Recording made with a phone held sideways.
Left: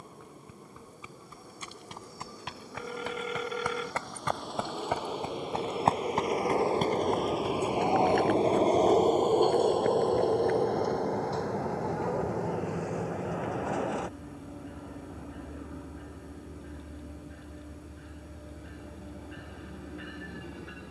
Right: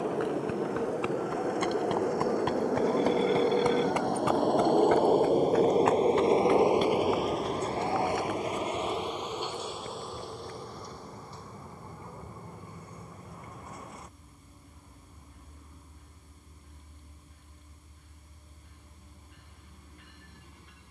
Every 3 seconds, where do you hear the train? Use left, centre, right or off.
right, right, centre, left, left, left, left.